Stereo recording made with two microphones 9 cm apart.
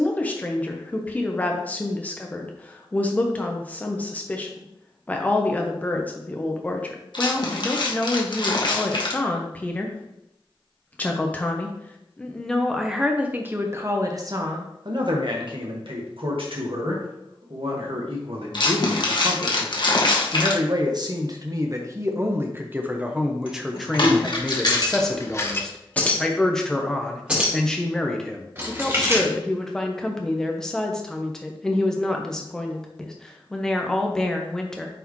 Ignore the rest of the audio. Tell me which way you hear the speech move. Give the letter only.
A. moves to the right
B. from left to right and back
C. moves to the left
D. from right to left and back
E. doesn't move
B.